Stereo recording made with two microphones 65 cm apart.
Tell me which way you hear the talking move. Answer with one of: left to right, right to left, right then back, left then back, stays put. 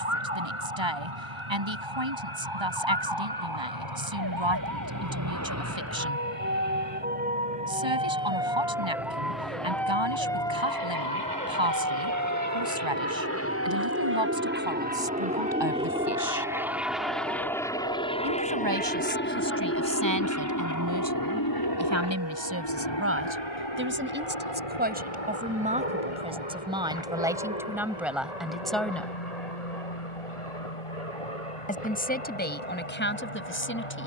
right to left.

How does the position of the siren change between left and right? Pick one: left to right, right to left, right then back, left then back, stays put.
right to left.